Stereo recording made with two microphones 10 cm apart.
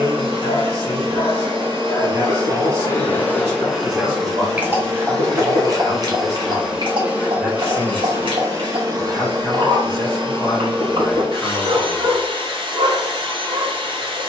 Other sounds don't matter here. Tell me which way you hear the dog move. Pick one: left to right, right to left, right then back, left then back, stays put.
left to right.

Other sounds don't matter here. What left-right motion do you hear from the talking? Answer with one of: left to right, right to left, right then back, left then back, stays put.
right to left.